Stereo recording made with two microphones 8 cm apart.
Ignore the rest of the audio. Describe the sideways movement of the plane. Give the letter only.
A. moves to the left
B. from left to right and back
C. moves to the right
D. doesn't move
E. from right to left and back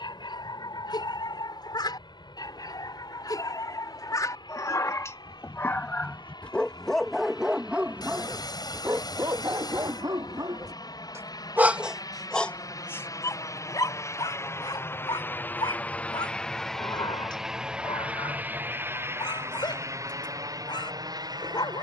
C.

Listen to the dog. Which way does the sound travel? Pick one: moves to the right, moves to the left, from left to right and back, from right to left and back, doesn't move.
from left to right and back.